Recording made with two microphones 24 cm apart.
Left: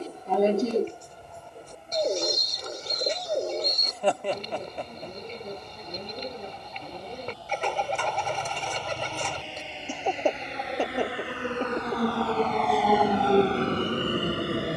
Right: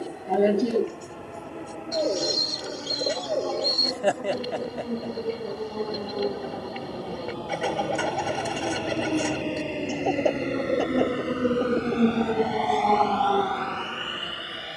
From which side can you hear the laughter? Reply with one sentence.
You can hear the laughter in the centre.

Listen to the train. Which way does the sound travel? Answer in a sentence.
In this clip you hear the train move from right to left.